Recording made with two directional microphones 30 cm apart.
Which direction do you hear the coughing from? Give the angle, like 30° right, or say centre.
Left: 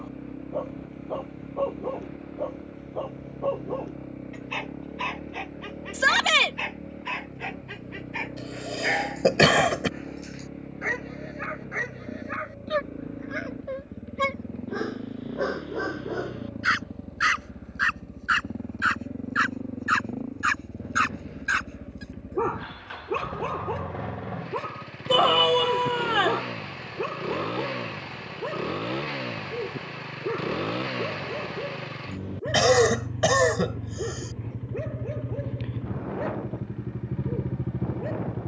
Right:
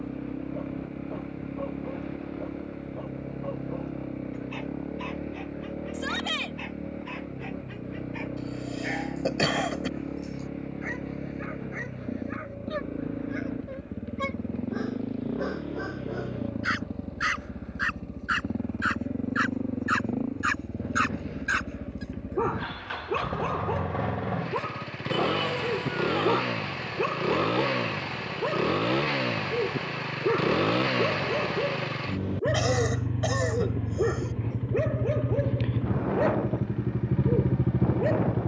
50° left.